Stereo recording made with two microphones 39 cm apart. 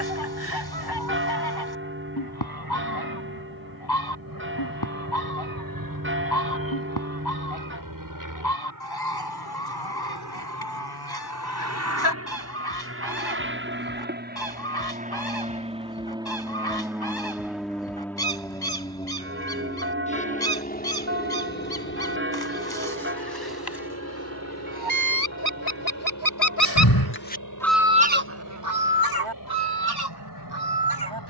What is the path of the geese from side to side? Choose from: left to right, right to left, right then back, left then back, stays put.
left to right.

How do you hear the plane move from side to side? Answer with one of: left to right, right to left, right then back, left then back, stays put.
right to left.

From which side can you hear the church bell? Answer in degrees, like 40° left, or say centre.
30° right.